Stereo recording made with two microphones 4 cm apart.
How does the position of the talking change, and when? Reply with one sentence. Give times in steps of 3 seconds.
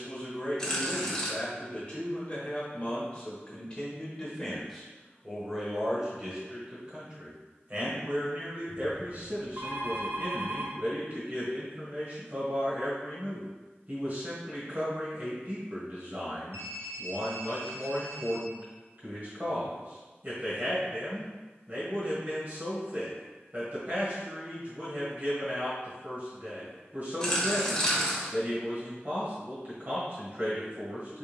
You can hear the talking on the left from 0 s, in the centre from 3 s and on the right from 6 s.